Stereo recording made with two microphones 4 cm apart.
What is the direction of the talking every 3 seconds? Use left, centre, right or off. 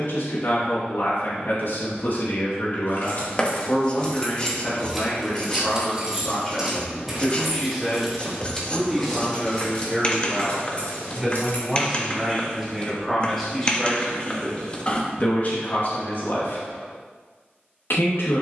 left, left, centre, centre, centre, left.